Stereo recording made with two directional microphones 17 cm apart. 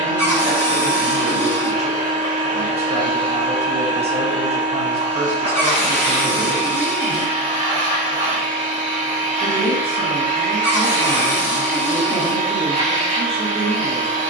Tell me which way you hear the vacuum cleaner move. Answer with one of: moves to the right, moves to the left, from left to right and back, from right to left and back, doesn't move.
doesn't move.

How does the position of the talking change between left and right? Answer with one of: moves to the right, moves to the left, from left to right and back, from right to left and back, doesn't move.
doesn't move.